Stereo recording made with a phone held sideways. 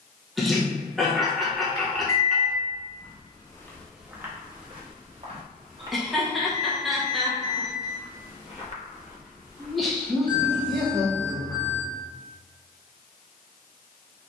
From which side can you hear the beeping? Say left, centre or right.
left.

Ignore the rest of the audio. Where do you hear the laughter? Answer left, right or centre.
centre.